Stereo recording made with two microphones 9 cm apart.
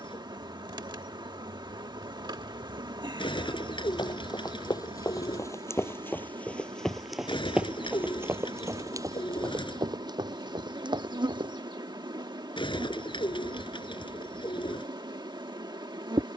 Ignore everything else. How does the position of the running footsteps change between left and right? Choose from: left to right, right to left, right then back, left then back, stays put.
left to right.